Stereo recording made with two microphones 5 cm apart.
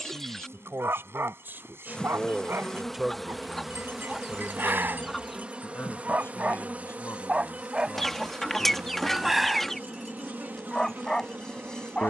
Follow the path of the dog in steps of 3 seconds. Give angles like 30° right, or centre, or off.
50° right, 40° right, 20° right, 10° left.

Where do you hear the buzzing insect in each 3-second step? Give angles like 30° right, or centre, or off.
20° left, 10° right, 30° right, 40° right.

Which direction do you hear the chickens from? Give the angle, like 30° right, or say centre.
10° left.